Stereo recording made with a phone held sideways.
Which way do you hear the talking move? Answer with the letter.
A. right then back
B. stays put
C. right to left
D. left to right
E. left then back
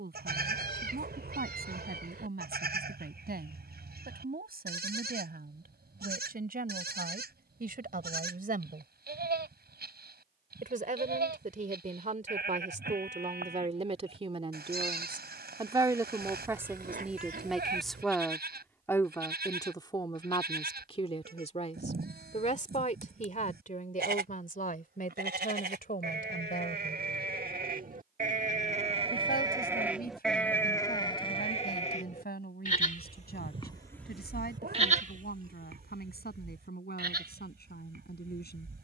C.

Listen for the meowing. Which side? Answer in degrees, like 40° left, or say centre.
70° right.